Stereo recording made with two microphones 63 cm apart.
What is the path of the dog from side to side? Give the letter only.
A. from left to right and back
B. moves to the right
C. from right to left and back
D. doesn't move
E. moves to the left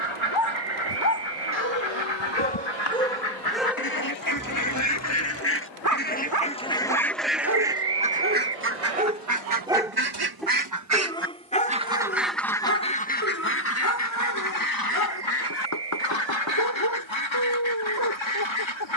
A.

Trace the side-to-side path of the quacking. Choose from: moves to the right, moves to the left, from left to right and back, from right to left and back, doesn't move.
from left to right and back.